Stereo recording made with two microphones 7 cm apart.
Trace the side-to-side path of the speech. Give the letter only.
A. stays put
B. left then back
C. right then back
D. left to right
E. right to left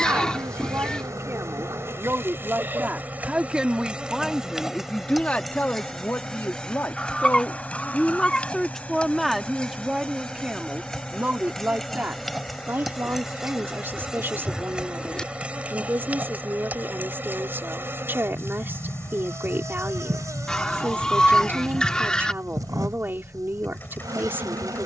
B.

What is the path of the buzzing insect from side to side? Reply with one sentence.
In this clip you hear the buzzing insect move from right to left and back again.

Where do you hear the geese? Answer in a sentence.
You can hear the geese in the centre.